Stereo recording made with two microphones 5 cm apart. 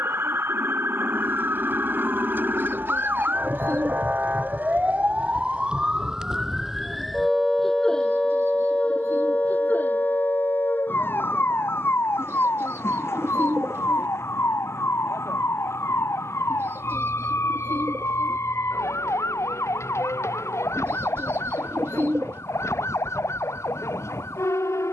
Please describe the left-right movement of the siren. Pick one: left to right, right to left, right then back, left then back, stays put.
right to left.